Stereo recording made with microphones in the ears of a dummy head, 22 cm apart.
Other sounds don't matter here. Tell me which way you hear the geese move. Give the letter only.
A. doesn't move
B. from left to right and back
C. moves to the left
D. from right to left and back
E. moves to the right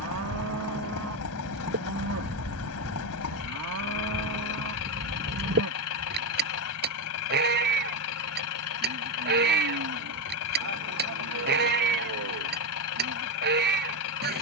A.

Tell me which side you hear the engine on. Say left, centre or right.
left.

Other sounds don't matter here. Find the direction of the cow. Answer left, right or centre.
right.